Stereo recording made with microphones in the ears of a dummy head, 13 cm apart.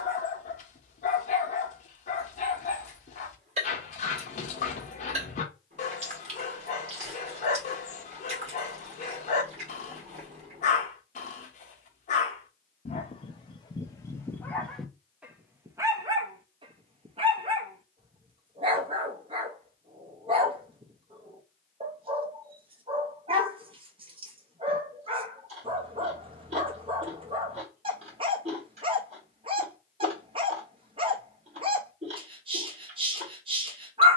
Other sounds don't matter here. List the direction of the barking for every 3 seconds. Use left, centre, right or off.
left, left, left, left, left, right, right, right, right, right, right, right.